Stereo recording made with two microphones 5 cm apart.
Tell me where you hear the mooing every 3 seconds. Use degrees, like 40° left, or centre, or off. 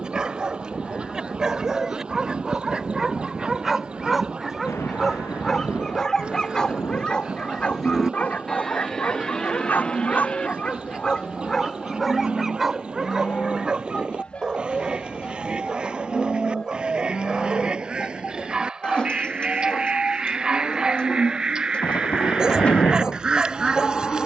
centre, 30° right, centre, 20° left, 20° left, 20° left, 20° left, 20° left.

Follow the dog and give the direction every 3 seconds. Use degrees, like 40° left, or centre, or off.
10° right, centre, 20° left, 20° left, 10° right, 10° right, 10° right, 10° right.